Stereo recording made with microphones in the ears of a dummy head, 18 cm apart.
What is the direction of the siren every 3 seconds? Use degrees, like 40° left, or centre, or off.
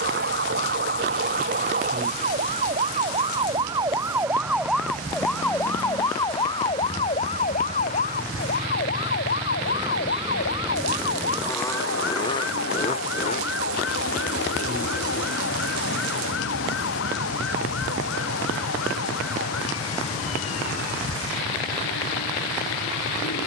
50° right, 10° right, 30° left, 50° left, 60° left, 70° left, 70° left, 80° left.